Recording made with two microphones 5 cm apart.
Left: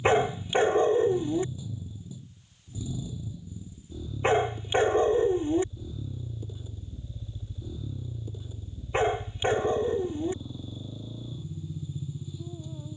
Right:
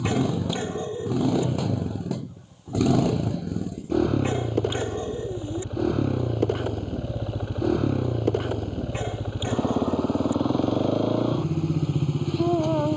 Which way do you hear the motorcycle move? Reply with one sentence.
You can hear the motorcycle stay put.